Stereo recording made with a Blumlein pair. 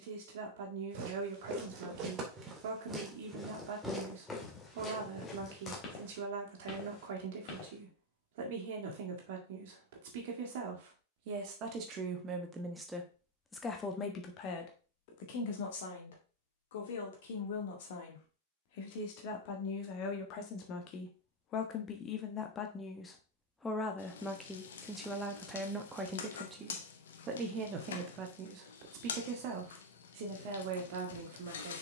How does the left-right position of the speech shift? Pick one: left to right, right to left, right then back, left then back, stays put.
left then back.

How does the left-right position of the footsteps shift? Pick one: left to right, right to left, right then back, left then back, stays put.
right to left.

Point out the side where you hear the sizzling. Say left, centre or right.
left.